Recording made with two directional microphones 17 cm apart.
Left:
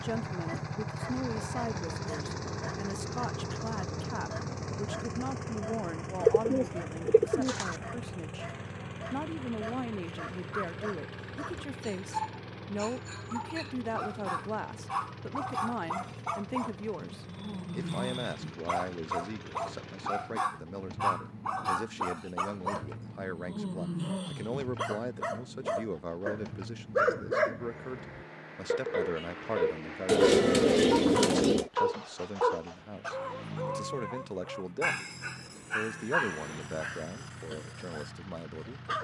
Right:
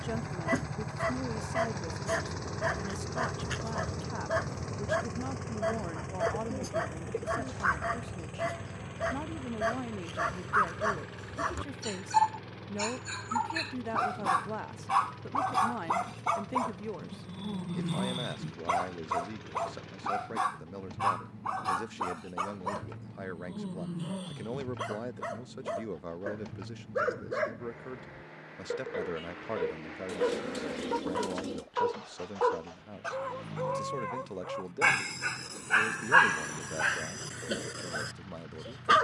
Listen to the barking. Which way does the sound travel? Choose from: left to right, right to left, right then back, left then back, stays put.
left then back.